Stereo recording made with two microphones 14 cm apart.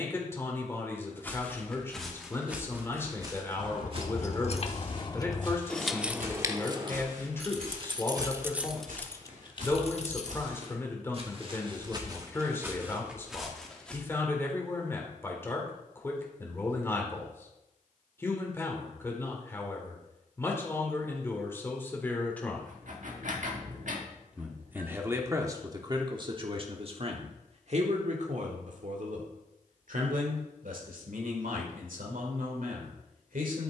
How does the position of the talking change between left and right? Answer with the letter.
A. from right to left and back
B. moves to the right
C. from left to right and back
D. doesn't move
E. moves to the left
B.